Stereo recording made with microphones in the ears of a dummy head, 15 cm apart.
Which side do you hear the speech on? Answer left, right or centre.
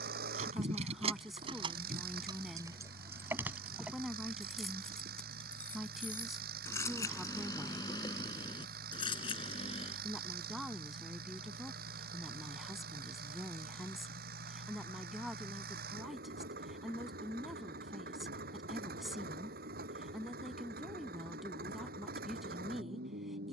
centre.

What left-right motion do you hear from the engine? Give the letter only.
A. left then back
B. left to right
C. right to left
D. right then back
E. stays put
E.